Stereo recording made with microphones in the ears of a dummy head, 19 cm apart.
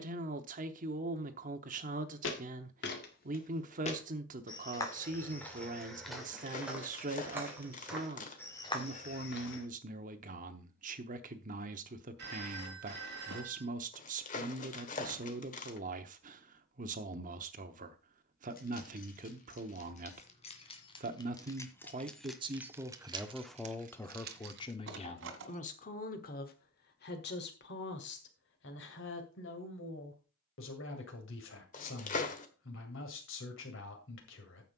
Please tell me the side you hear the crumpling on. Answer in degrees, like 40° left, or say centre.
40° left.